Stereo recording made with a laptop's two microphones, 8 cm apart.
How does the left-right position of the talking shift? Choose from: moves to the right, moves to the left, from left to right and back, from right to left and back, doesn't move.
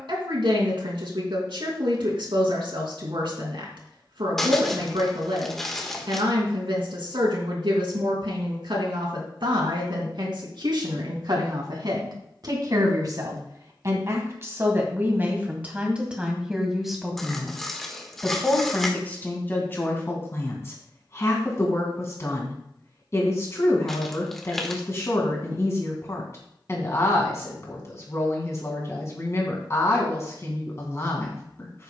moves to the left.